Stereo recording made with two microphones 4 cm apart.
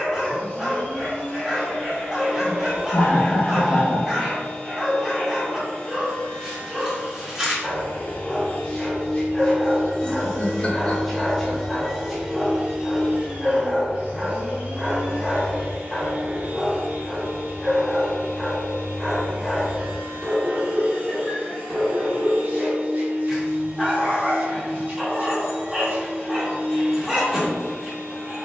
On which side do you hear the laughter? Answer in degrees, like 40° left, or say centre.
30° left.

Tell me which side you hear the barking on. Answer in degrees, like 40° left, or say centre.
10° right.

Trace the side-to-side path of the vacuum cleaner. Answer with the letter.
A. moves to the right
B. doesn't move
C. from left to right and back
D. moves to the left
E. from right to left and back
A.